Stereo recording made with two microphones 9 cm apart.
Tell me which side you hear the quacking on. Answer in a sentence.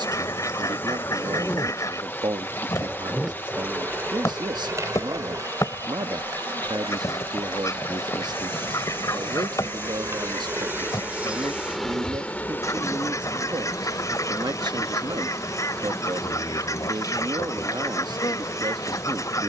You can hear the quacking on the left.